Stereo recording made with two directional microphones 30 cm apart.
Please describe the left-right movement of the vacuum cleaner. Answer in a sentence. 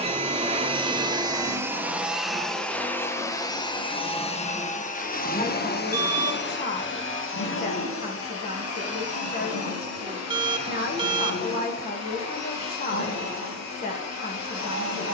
You can hear the vacuum cleaner travel towards the left.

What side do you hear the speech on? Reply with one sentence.
You can hear the speech on the left.